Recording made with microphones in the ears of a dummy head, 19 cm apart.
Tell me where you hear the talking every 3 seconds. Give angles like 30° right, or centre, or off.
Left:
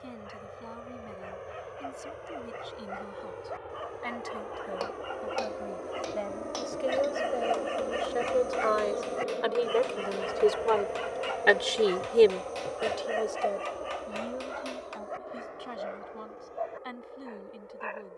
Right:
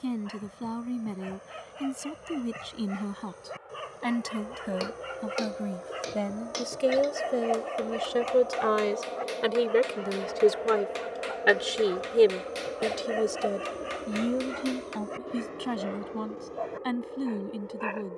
70° right, 70° right, 50° right, 20° right, 40° right, 70° right.